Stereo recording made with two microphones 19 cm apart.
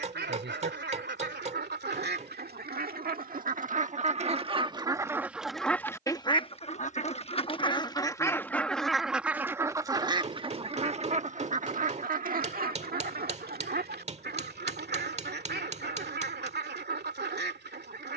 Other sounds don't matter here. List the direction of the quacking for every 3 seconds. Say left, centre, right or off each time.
right, right, left, right, right, right.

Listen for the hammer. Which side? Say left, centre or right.
right.